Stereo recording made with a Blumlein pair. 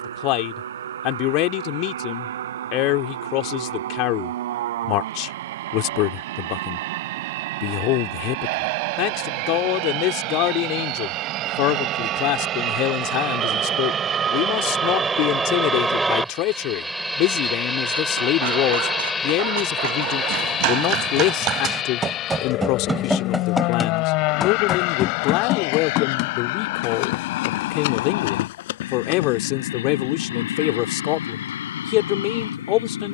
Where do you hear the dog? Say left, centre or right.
right.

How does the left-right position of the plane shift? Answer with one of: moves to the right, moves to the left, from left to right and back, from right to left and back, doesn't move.
moves to the left.